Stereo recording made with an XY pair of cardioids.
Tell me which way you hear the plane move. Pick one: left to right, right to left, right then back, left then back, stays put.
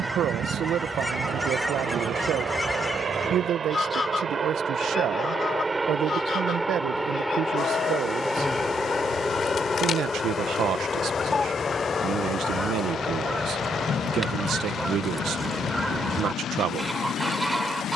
right to left.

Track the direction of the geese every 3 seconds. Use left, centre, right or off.
centre, left, left, left, centre, centre.